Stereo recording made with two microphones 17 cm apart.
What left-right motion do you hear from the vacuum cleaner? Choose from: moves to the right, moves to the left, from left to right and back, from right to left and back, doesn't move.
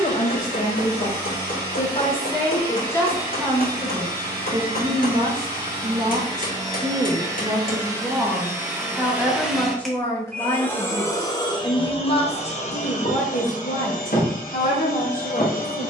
moves to the left.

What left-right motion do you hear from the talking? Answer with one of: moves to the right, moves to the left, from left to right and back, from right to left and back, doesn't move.
from left to right and back.